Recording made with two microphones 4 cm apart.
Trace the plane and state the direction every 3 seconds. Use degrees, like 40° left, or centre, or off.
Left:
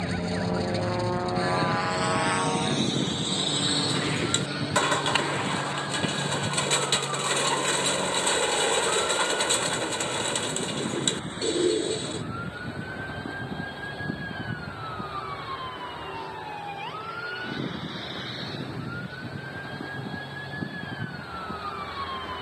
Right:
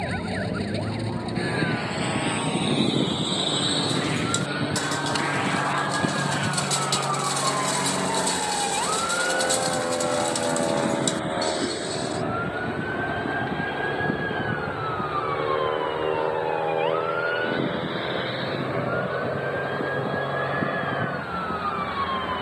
30° left, 10° right, 40° right, 60° right, 70° right, 70° right, 70° right, 70° right.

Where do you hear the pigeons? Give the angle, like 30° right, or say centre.
40° left.